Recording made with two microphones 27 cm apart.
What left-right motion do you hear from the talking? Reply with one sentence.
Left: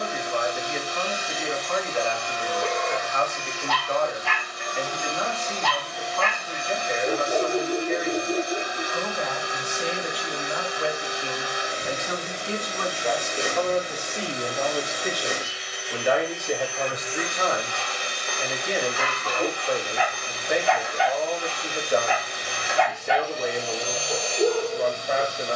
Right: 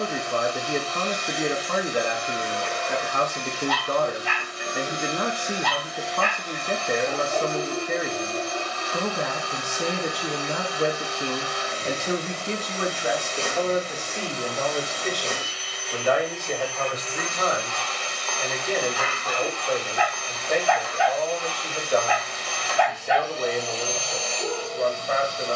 In this clip you hear the talking travel towards the left.